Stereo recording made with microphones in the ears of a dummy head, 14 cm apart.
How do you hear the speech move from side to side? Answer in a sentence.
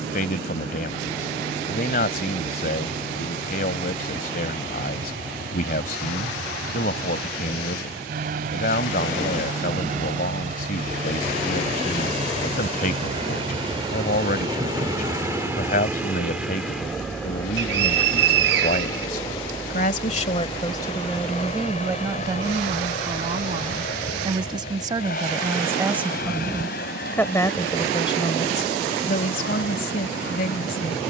In this clip you hear the speech go right and come back.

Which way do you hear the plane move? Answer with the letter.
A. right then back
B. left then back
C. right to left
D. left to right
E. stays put
C.